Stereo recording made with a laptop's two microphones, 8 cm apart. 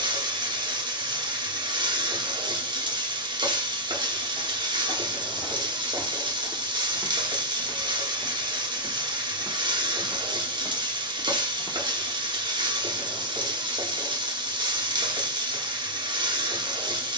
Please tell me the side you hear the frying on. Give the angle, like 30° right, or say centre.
70° right.